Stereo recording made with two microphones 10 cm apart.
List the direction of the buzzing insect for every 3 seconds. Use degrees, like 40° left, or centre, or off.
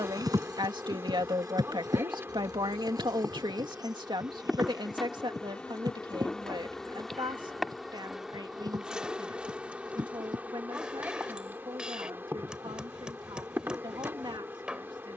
20° right, 10° right, centre, 20° right, 20° right.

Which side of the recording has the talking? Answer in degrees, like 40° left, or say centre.
50° right.